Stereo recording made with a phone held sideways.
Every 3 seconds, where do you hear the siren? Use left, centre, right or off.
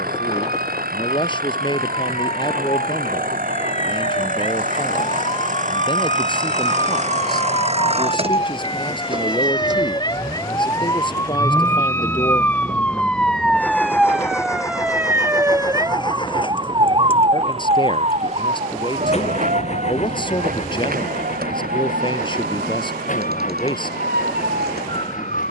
left, left, left, left, centre, right, right, right, right.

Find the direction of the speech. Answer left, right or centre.
left.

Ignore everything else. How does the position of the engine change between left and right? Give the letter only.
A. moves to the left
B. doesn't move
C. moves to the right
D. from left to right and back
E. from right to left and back
A.